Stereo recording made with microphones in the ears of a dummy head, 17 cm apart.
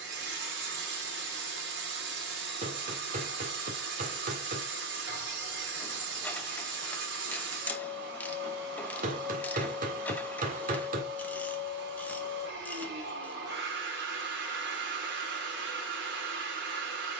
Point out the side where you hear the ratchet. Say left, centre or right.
centre.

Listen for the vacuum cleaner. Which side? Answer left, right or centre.
right.